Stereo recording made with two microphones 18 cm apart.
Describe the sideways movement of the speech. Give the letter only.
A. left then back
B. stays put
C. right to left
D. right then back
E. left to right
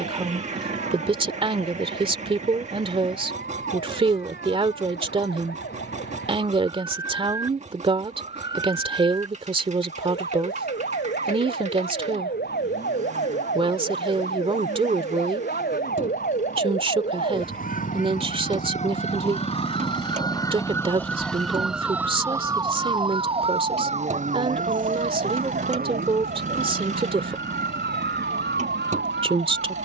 B.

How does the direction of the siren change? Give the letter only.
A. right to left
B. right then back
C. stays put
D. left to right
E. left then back
D.